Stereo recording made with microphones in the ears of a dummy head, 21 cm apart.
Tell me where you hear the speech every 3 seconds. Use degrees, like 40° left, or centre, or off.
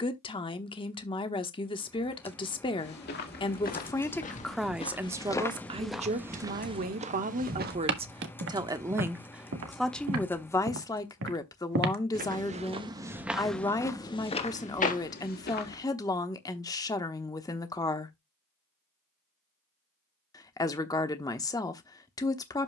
20° left, centre, 30° right, 10° left, 20° left, 20° left, 20° left, 20° left.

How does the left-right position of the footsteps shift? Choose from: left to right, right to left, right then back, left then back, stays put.
right then back.